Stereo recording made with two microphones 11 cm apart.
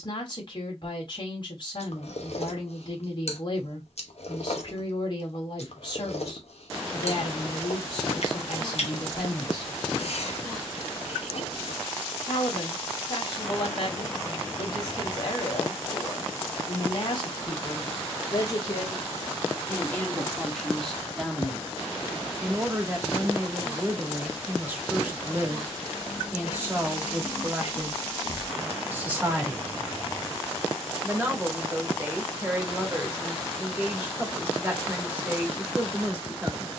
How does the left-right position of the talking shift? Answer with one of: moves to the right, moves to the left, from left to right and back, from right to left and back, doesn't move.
moves to the right.